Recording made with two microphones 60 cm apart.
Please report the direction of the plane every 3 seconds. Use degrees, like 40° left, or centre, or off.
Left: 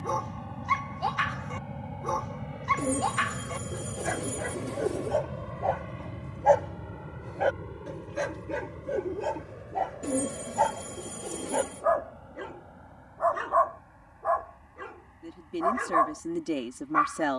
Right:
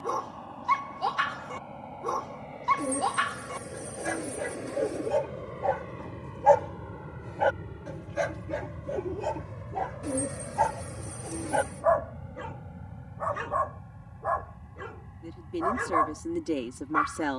50° left, 30° left, centre, 30° right, 50° right, 60° right.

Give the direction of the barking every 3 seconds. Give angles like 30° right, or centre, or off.
70° right, 60° right, 20° right, centre, 50° right, 60° right.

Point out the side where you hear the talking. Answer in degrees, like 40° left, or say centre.
10° left.